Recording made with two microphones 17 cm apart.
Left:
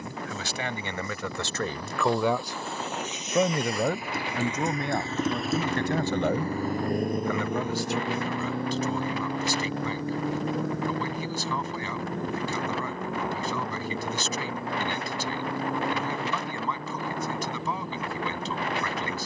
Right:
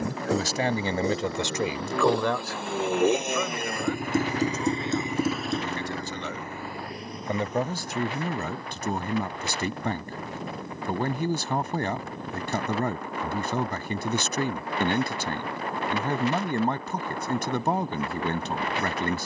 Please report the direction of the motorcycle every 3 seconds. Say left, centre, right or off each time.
right, right, left, left, left, left, off.